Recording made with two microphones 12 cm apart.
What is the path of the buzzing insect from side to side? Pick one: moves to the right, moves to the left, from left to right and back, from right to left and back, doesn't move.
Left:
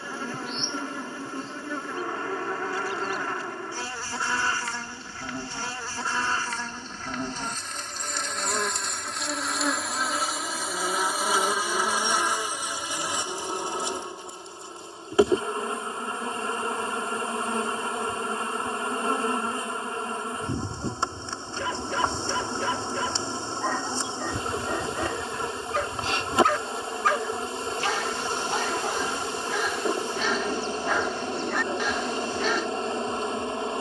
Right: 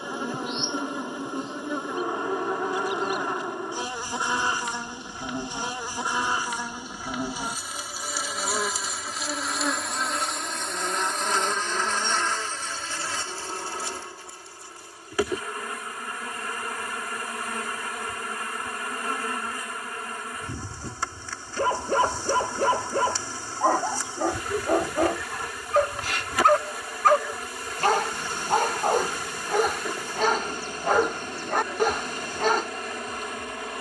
moves to the left.